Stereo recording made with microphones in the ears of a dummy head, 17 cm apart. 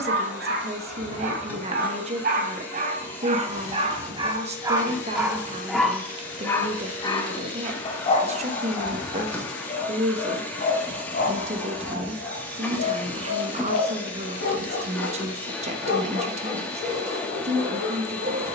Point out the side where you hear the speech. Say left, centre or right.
right.